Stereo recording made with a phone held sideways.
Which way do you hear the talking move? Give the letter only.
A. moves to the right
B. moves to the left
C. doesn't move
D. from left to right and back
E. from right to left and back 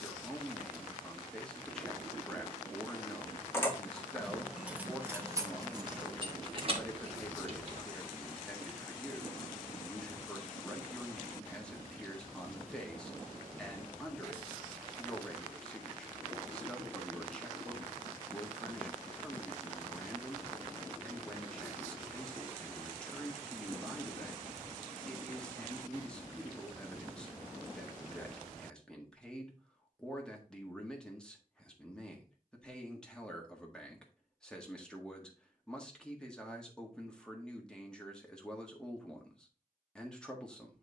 C.